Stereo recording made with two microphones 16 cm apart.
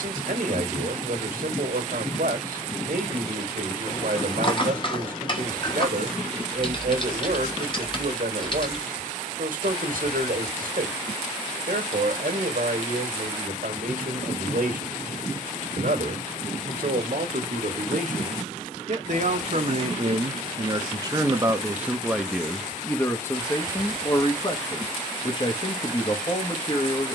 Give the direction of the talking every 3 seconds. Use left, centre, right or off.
right, right, right, right, right, right, right, centre, left.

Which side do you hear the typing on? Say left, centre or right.
left.